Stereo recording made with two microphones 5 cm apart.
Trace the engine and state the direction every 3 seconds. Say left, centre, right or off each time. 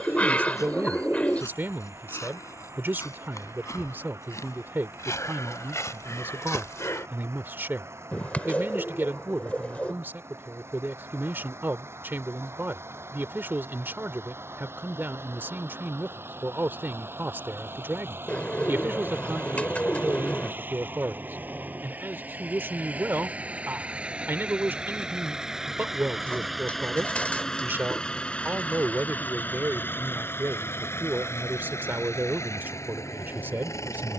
right, right, right, right, right, right, right, right, centre, left, left, left.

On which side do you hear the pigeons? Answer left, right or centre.
left.